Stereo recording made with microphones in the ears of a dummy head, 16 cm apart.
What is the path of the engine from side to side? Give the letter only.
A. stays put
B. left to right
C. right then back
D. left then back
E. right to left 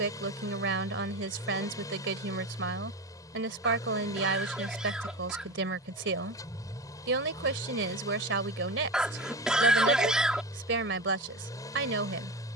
A.